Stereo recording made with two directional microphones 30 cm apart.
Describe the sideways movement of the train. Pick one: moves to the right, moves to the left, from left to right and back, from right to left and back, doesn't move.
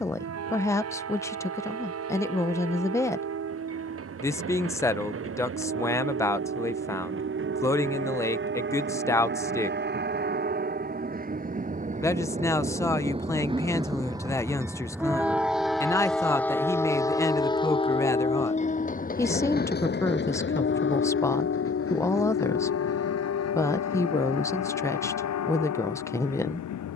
moves to the left.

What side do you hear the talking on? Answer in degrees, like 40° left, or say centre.
10° left.